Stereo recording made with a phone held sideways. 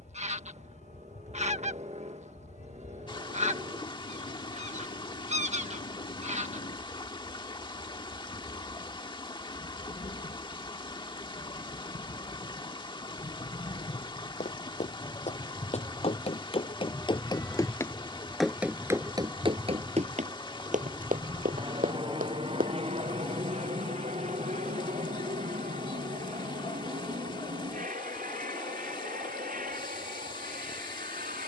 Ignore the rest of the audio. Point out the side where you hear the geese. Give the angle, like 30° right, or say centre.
50° right.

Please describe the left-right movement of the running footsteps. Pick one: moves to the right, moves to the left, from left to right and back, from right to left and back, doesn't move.
moves to the right.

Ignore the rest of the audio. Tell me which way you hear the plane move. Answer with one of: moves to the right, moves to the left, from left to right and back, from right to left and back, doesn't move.
moves to the right.